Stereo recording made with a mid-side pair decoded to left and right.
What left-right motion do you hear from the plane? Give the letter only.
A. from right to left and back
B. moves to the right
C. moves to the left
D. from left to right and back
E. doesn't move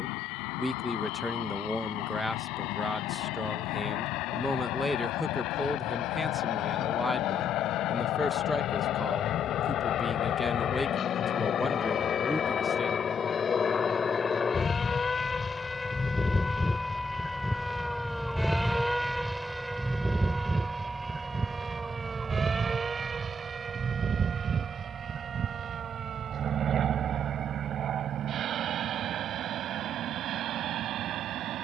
B.